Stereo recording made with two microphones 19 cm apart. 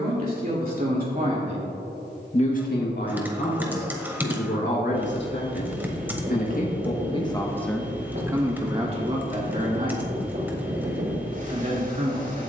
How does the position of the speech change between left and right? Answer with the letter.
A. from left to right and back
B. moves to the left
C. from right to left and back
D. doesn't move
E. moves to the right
C.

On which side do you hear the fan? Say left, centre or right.
right.